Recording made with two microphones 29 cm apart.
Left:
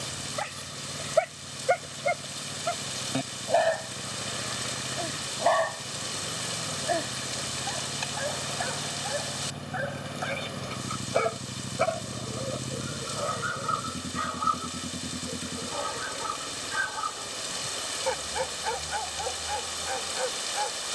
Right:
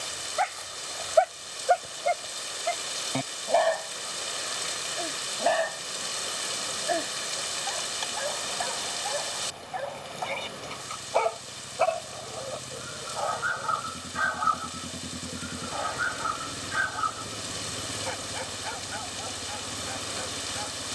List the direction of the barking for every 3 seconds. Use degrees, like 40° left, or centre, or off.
30° left, centre, centre, 10° left, 30° left, 50° left, 60° left.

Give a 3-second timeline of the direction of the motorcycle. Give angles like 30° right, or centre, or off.
80° left, 80° left, 70° left, 60° left, 30° left, 10° right, 40° right.